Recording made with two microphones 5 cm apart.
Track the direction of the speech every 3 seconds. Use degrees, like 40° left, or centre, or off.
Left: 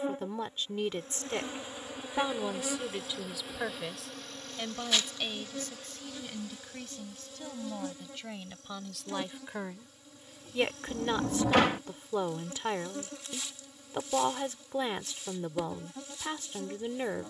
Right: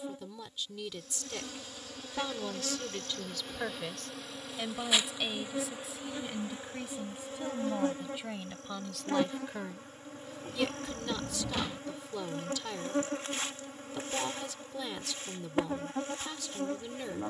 30° left, centre, 10° right, 20° left, 30° left, 30° left.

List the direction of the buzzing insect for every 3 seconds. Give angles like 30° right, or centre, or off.
20° left, 10° right, 40° right, 40° right, 40° right, 40° right.